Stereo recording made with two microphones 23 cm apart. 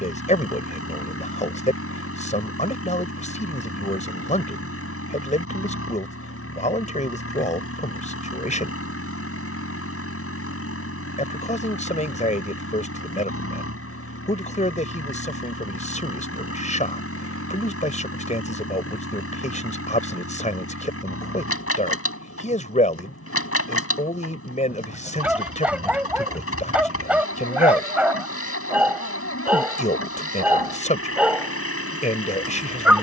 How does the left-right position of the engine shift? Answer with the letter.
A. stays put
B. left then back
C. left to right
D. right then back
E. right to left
A.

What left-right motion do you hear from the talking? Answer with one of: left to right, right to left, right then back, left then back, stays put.
stays put.